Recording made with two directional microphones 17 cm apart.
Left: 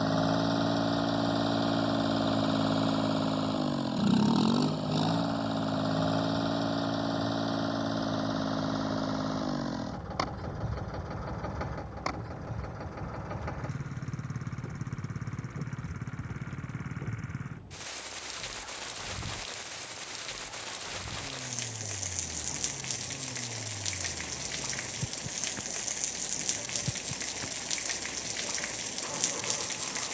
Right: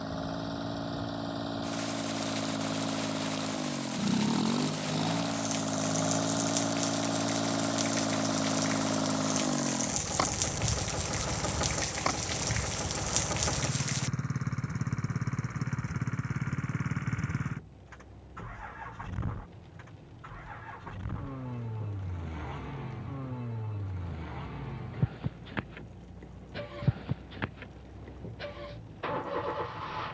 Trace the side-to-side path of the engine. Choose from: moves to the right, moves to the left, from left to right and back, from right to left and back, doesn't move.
moves to the right.